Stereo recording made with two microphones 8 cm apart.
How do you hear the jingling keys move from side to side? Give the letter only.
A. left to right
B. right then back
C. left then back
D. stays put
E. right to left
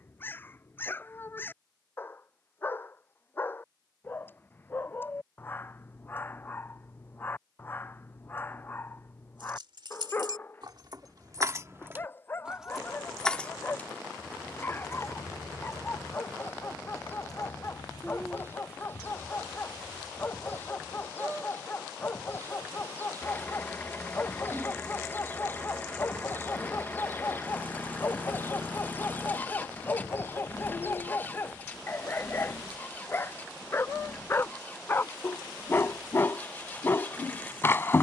E.